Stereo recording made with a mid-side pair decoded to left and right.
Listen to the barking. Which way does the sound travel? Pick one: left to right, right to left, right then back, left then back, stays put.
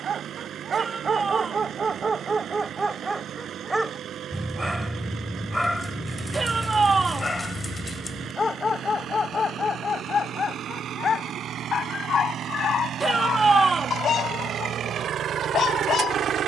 right to left.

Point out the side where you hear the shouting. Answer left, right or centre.
right.